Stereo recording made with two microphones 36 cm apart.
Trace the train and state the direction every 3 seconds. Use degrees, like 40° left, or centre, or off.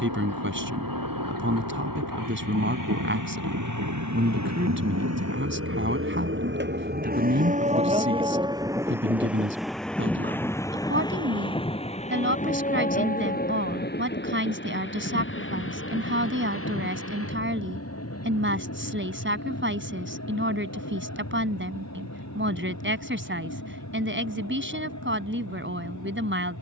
70° right, 50° right, 20° right, 10° left, 20° left, 40° left, 40° left, 50° left, 50° left.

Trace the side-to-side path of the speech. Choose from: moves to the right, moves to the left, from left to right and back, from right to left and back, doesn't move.
doesn't move.